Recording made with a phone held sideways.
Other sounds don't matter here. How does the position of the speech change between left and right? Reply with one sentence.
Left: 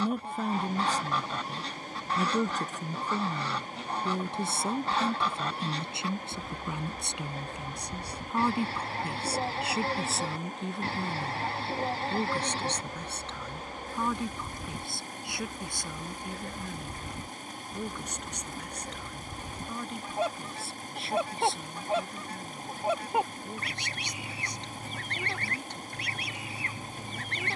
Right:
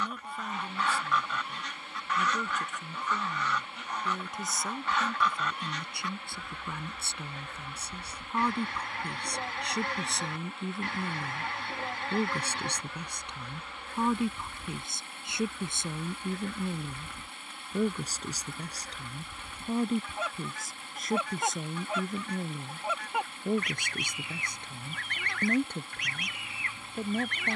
You can hear the speech go from the left side to the right.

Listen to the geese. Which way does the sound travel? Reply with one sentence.
You can hear the geese stay put.